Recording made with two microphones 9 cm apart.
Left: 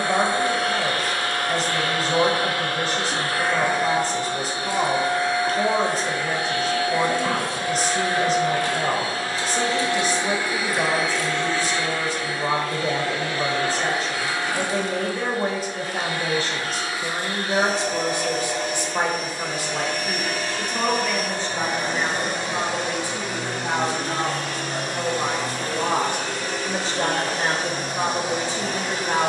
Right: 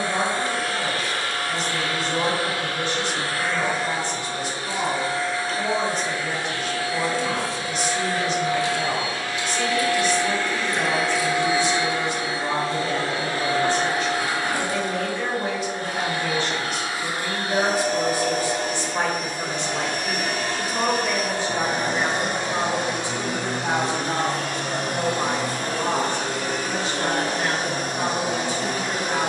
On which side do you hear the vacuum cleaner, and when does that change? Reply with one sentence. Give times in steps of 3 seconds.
You can hear the vacuum cleaner on the left from 0 s, in the centre from 9 s and on the right from 12 s.